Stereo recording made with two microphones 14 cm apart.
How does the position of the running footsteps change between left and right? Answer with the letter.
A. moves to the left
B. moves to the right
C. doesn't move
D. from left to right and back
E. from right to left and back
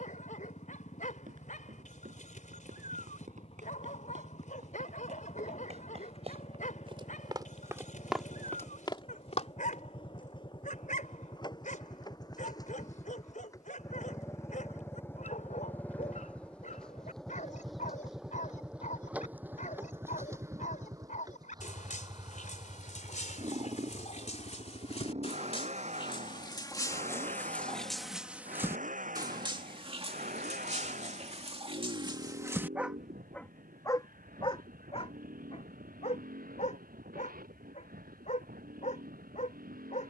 A.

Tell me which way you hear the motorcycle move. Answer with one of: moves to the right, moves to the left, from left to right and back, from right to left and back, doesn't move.
moves to the right.